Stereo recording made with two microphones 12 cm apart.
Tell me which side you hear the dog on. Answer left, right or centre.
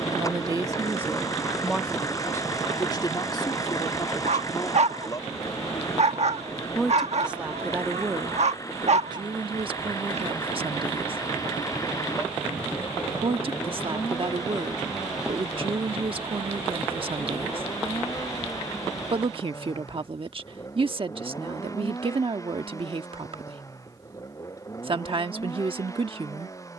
right.